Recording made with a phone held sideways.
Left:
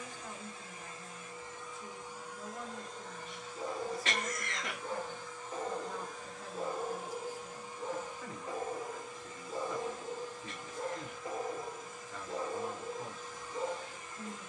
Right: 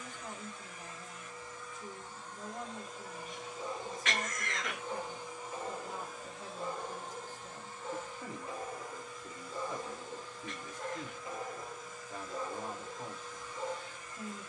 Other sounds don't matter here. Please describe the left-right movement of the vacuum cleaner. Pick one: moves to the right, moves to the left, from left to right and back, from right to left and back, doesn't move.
from left to right and back.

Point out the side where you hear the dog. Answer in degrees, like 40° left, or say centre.
40° left.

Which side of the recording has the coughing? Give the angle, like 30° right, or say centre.
30° left.